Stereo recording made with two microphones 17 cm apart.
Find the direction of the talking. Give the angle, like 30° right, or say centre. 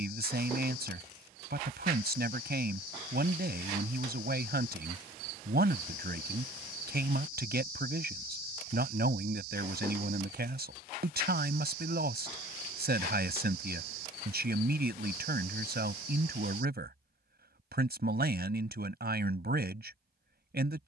70° right.